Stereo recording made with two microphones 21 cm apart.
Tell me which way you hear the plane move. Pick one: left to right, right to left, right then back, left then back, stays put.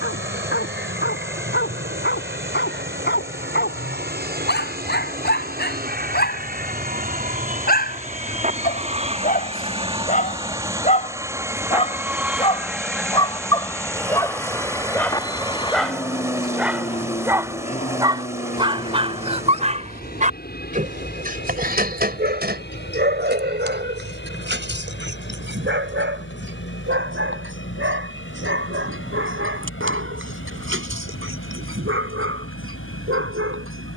right to left.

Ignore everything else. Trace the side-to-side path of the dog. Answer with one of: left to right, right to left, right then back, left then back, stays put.
left to right.